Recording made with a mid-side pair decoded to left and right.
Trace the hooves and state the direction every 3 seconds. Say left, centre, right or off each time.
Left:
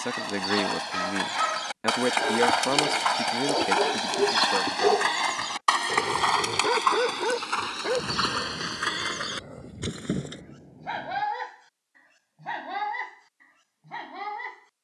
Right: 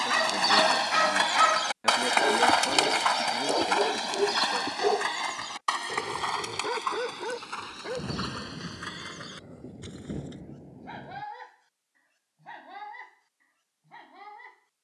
right, left, left, left, off.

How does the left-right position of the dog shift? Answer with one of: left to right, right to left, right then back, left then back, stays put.
right to left.